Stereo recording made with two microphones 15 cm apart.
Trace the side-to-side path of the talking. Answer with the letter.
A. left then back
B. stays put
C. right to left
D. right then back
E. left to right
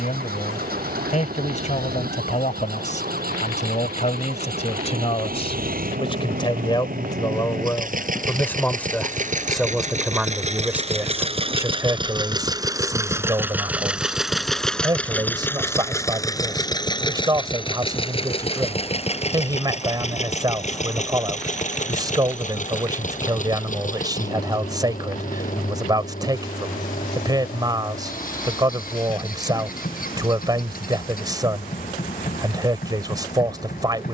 E.